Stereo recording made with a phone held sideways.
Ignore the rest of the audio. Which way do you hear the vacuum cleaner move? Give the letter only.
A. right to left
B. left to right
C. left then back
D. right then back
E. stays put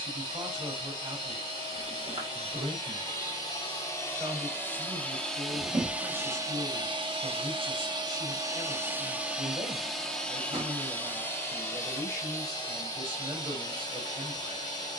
D.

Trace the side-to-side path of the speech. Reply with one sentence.
You can hear the speech stay put.